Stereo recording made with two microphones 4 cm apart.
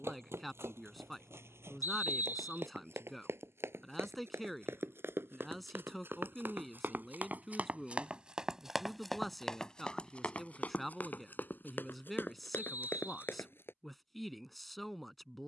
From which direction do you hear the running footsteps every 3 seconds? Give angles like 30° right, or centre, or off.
80° right, 70° right, 40° right, 30° left, 60° left.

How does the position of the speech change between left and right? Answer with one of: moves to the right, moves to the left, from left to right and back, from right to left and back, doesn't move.
doesn't move.